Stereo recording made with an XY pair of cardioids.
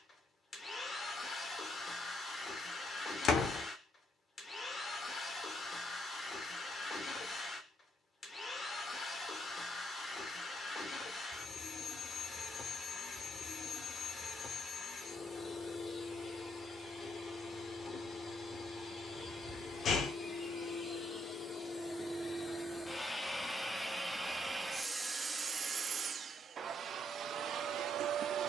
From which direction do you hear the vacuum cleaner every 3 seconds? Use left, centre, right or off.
left, left, left, left, left, left, left, left, right, right.